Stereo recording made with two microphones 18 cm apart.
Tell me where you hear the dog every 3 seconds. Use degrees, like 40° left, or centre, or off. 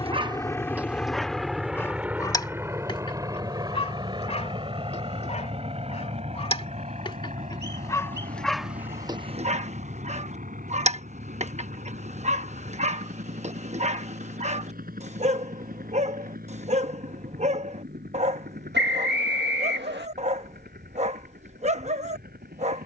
centre, 30° left, 10° left, 40° right, 40° right, 40° right, 40° right, 40° right.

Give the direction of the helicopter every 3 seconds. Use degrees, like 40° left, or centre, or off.
centre, 20° right, 40° right, 40° right, 50° right, 50° right, 50° right, 50° right.